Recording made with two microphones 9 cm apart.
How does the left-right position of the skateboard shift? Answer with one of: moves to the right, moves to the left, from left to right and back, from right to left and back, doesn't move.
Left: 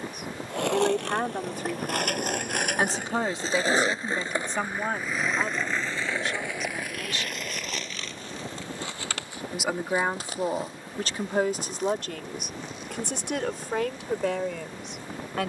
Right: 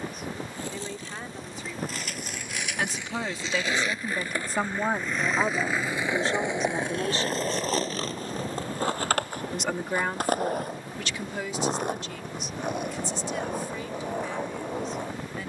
moves to the right.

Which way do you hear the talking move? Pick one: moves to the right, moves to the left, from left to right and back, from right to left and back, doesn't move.
from left to right and back.